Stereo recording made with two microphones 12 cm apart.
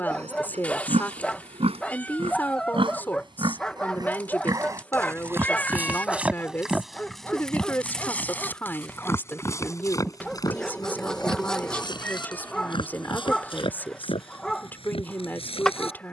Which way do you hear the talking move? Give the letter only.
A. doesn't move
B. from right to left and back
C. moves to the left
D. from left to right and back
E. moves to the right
A.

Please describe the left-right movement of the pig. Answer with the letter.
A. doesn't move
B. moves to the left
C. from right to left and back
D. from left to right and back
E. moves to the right
B.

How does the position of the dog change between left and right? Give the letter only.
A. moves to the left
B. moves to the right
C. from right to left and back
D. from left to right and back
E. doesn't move
E.